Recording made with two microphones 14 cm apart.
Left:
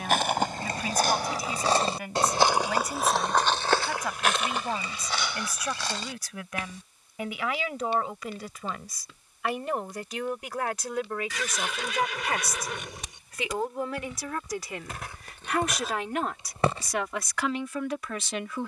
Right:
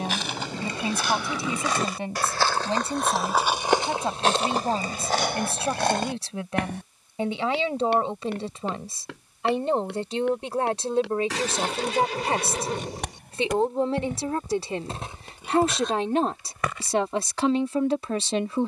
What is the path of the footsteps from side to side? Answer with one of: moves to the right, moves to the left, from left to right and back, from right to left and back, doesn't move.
from left to right and back.